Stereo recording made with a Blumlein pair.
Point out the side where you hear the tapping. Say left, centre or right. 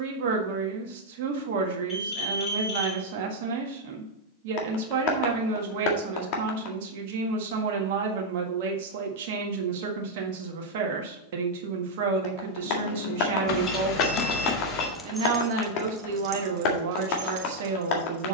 left.